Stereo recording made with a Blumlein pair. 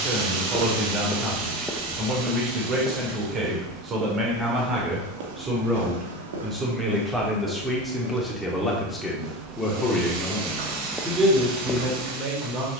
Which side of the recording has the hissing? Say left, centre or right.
right.